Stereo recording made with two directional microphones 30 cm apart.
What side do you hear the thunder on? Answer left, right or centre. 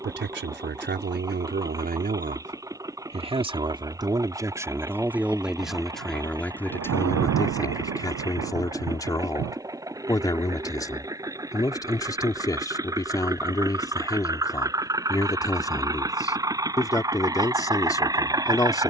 right.